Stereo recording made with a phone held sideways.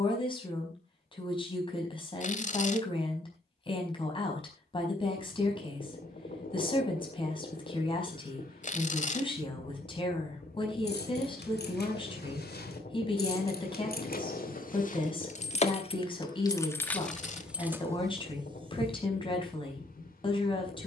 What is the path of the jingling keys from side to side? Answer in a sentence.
In this clip you hear the jingling keys move from left to right.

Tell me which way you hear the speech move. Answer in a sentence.
In this clip you hear the speech stay put.